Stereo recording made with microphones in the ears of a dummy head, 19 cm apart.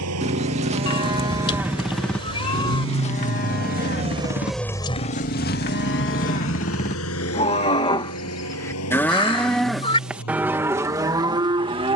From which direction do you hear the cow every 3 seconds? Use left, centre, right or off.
centre, left, left, centre.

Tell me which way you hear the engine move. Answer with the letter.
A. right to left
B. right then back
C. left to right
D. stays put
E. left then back
A.